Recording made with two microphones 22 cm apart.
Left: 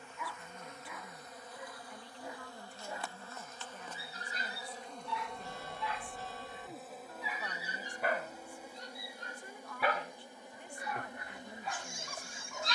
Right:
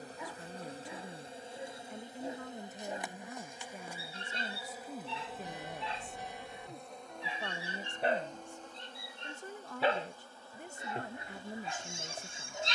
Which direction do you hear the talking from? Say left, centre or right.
right.